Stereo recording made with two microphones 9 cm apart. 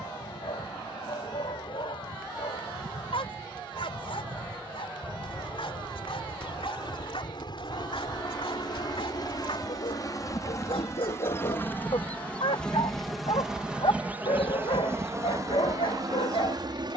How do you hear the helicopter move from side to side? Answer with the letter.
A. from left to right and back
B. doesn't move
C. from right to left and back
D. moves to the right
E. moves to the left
D.